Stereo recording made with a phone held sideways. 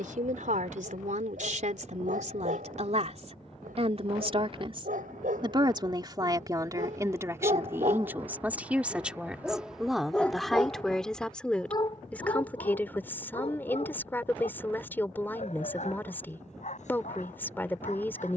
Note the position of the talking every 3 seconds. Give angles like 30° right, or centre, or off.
60° right, 40° right, 20° right, centre, 10° left, 10° left.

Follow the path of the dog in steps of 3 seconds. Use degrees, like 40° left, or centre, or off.
80° right, 80° right, 50° right, 10° left, 40° left, 60° left.